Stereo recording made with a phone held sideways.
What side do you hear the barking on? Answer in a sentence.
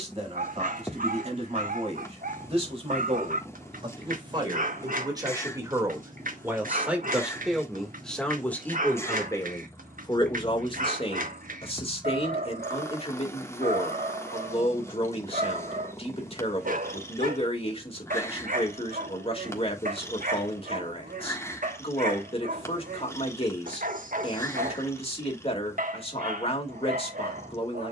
In this clip you hear the barking on the right.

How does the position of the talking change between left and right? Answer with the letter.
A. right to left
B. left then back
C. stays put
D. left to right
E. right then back
A.